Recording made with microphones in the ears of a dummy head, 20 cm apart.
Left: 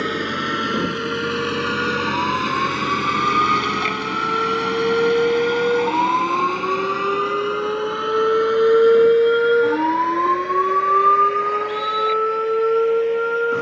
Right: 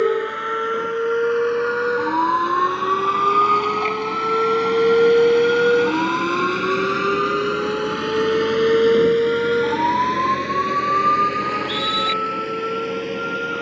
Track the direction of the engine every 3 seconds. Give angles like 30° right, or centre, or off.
50° left, 10° left, 30° right, 50° right, 60° right.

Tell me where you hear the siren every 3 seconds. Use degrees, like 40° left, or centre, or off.
60° right, 40° right, centre, 40° left, 60° left.